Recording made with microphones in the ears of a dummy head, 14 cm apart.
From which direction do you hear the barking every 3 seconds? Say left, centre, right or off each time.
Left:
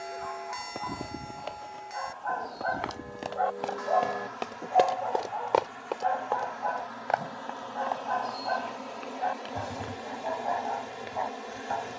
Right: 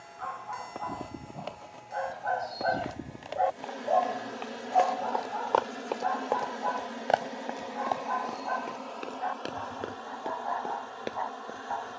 right, centre, left, left.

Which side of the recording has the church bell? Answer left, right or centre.
left.